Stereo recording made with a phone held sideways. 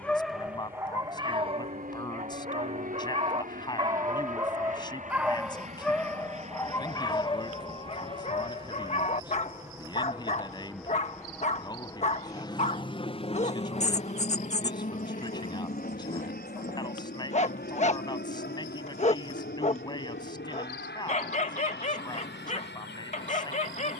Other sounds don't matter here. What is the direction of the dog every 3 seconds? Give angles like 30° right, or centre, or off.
30° right, 20° right, 30° left, 40° left, 40° left, 40° left, 40° left, 40° left.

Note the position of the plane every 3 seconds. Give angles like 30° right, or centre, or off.
70° right, 60° right, 40° right, centre, 30° left, 60° left, 70° left, 70° left.